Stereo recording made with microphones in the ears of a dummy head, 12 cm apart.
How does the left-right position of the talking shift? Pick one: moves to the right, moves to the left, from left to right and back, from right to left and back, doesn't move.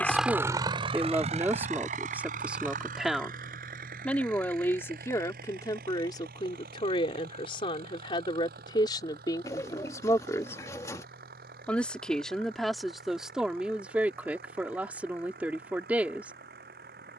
from right to left and back.